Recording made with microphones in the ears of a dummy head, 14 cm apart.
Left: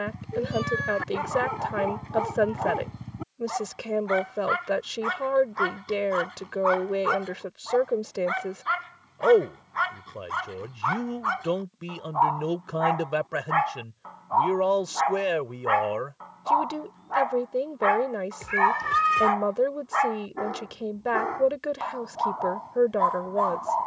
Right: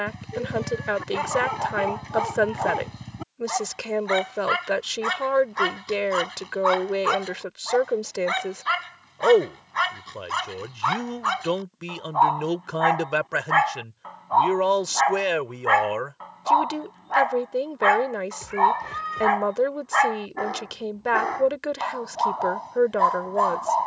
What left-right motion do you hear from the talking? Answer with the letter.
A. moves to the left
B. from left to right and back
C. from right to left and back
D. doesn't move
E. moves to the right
D.